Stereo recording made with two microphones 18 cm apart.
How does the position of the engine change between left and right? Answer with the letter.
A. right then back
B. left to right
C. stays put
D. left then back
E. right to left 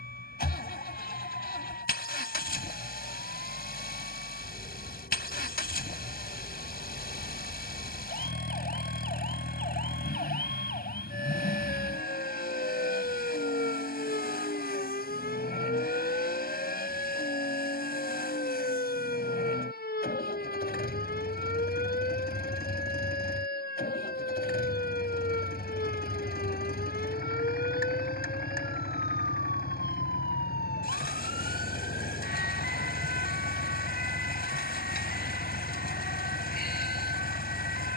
C.